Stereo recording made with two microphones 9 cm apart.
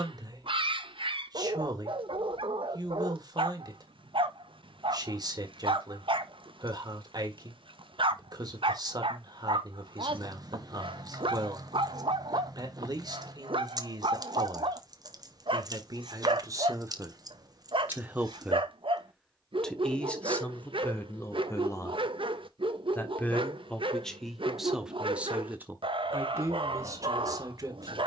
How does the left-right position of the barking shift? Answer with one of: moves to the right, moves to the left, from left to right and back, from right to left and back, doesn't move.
doesn't move.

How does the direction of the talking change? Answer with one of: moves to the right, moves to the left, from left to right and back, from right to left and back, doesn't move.
from right to left and back.